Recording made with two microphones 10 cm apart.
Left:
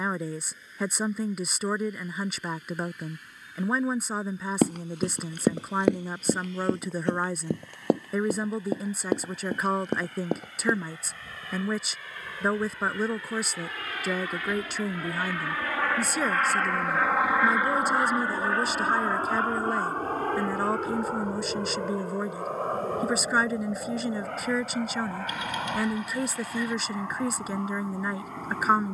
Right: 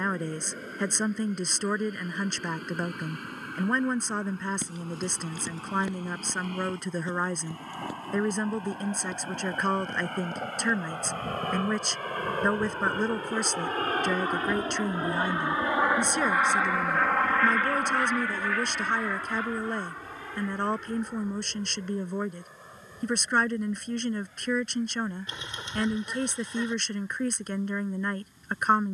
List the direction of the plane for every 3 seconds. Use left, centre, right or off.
right, right, right, right, right, centre, left, left, left, left.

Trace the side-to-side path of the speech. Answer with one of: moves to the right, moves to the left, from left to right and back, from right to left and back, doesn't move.
doesn't move.